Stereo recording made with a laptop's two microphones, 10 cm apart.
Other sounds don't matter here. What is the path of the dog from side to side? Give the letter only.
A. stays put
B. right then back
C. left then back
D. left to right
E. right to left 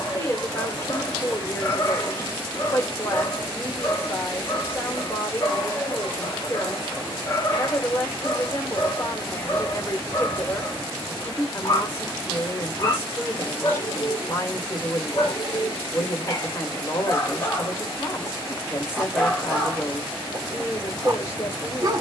D.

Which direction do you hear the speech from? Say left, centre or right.
left.